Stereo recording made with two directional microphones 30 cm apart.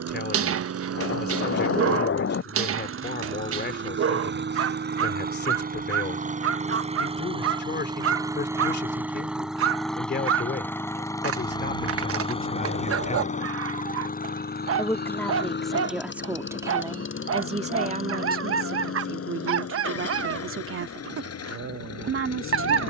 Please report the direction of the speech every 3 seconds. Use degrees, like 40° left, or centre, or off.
30° left, 30° left, 30° left, 30° left, 20° left, 10° right, 40° right, 40° right.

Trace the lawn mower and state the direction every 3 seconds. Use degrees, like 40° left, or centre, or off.
50° right, 40° right, 20° right, 10° left, 20° left, 40° left, 50° left, 50° left.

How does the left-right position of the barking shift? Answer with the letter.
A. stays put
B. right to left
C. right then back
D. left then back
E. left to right
A.